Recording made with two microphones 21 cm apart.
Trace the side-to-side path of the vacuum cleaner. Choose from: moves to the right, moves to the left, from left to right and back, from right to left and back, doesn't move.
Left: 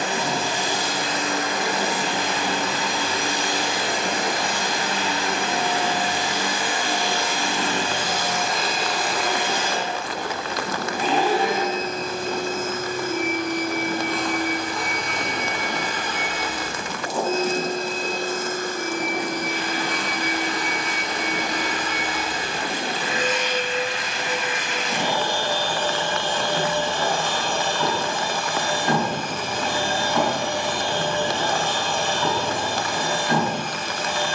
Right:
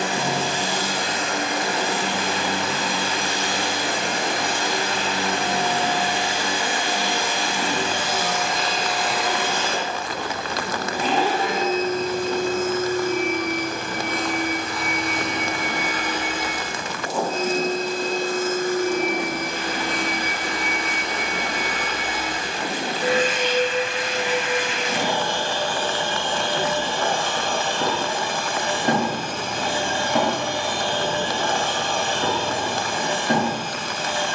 from right to left and back.